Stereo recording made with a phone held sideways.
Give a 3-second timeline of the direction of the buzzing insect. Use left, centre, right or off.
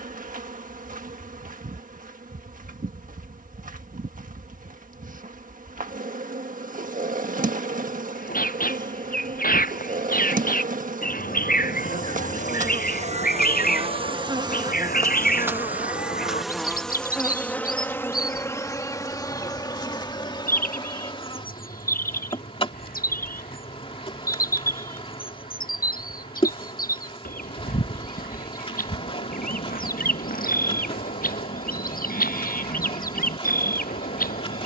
right, right, right, right, right, centre, left, left, left, left, left, left.